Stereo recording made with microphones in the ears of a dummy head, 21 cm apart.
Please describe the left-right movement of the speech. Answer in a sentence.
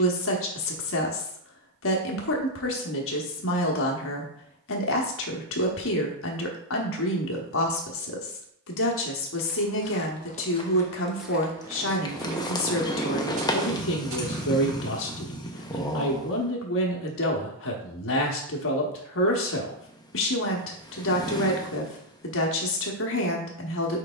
In this clip you hear the speech stay in one place.